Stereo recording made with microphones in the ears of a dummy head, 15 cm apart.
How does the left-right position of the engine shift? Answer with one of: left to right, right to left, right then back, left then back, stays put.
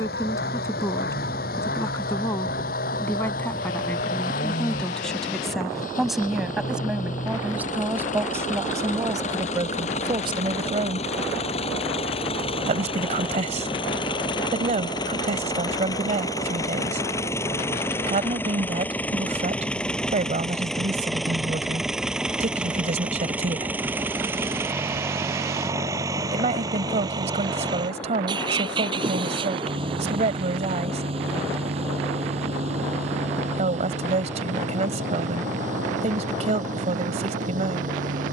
left to right.